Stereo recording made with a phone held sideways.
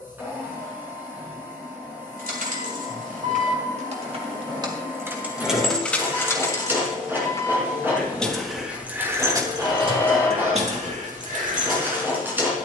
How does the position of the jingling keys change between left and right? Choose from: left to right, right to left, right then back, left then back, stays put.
left then back.